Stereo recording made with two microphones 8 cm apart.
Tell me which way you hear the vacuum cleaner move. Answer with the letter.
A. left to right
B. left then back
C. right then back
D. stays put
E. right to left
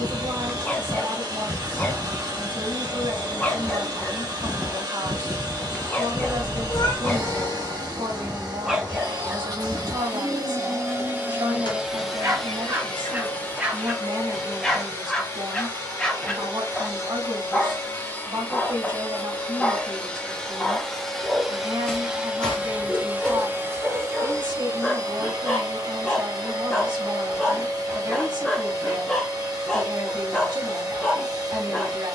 B.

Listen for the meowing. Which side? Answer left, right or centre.
left.